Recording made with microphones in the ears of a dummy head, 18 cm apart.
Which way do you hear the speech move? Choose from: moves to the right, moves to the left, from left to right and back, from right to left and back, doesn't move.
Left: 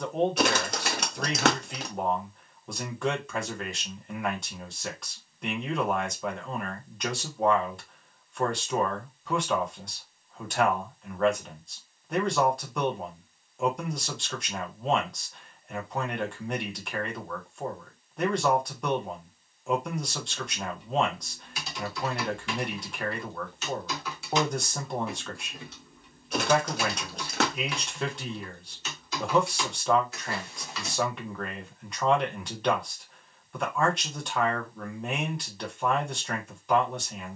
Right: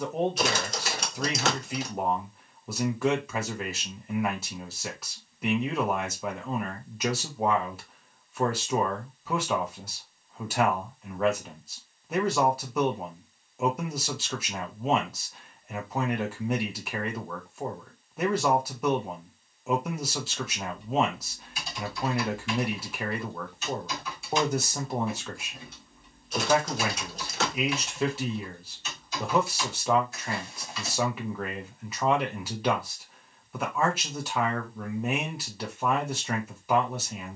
doesn't move.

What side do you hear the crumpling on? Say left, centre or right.
left.